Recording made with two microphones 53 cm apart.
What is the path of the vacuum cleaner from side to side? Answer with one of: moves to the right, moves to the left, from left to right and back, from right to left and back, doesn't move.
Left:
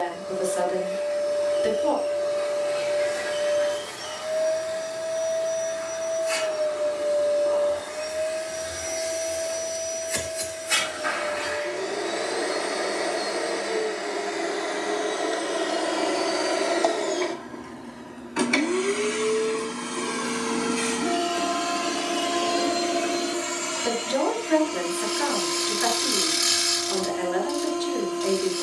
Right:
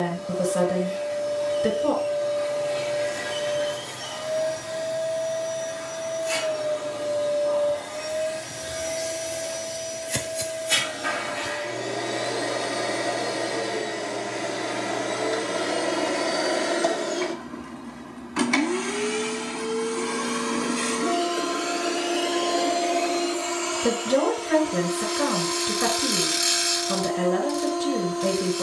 moves to the left.